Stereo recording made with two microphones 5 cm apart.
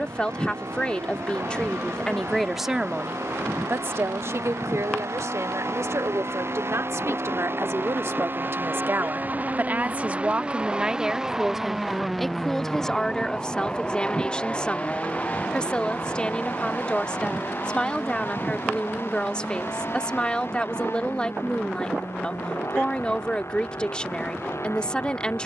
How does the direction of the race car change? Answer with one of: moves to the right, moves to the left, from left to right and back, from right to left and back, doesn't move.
moves to the left.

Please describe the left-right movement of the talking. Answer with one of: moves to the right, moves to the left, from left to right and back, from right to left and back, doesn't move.
from left to right and back.